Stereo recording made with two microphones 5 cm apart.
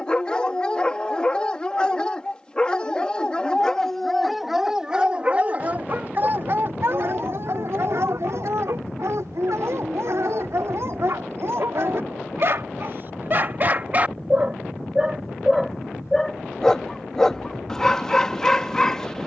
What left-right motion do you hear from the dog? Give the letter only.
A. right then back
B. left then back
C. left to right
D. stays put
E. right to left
A.